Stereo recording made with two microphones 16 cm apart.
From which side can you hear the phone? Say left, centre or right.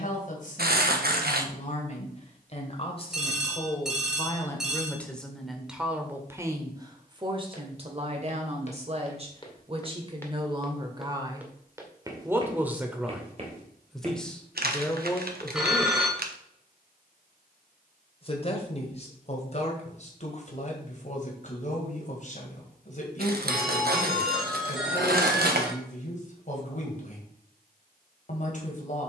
centre.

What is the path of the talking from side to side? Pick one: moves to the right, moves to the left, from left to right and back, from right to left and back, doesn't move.
from left to right and back.